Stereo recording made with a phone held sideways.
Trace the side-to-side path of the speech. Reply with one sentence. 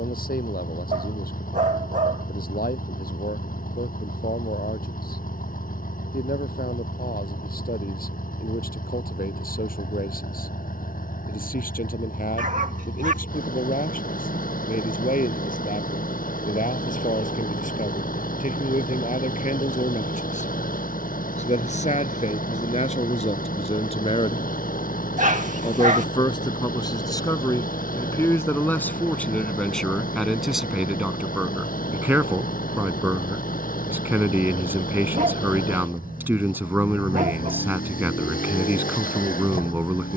You can hear the speech move to the right.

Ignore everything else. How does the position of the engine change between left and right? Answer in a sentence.
You can hear the engine stay in one place.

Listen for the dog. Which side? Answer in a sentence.
In this clip you hear the dog on the right.